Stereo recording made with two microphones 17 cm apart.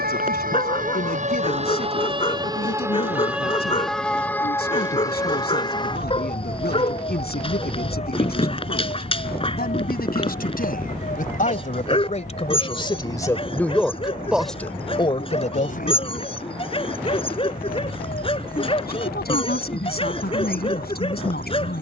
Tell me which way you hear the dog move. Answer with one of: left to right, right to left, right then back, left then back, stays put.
stays put.